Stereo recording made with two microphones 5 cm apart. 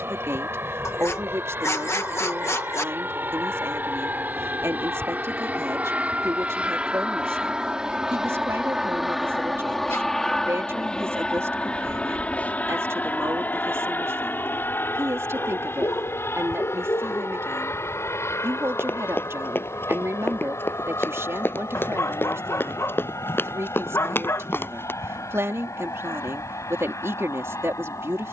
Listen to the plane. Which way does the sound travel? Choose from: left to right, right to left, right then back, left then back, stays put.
right to left.